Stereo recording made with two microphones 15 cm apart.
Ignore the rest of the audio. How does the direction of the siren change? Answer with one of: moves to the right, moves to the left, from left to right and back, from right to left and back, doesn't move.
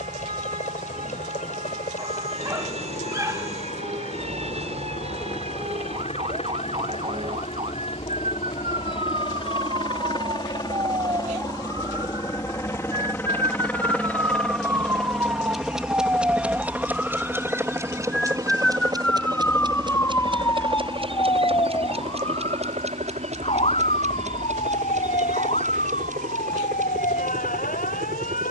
moves to the left.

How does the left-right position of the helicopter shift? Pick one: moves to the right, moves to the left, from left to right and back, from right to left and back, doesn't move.
moves to the right.